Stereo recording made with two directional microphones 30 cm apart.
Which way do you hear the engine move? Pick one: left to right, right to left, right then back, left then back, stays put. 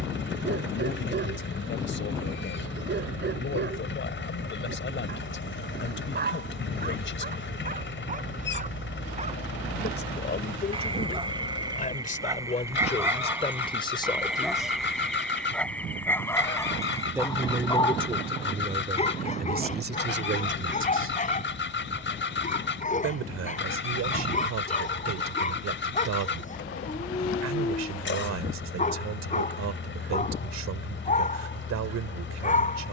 stays put.